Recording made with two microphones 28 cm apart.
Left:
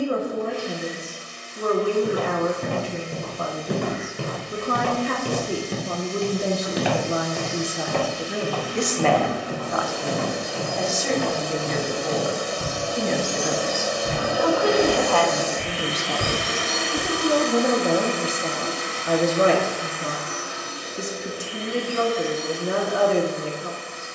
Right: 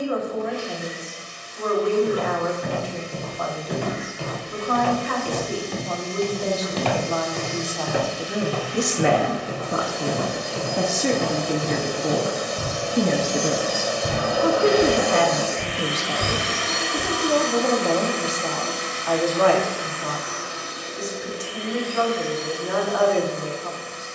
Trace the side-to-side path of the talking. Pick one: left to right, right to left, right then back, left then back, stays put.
right then back.